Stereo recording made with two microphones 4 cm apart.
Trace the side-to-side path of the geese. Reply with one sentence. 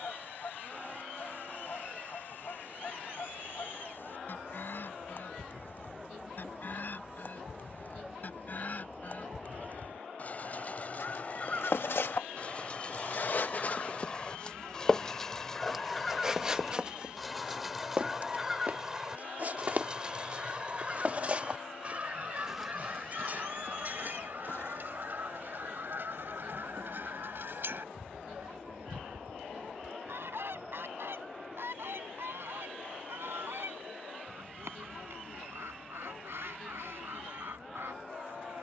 In this clip you hear the geese travel towards the right.